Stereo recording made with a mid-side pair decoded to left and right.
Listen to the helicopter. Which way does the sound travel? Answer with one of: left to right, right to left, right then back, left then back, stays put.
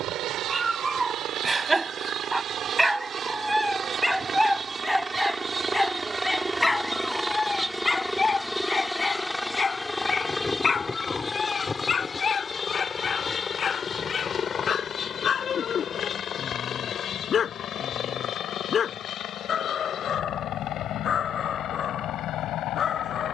right to left.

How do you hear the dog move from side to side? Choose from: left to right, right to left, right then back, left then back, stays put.
right to left.